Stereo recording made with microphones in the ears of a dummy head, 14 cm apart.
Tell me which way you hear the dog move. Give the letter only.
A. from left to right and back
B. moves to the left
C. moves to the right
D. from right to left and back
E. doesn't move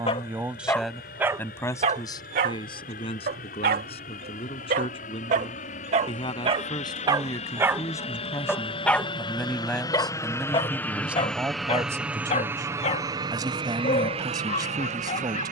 A.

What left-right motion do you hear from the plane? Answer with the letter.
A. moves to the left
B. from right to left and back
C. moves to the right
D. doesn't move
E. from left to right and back
C.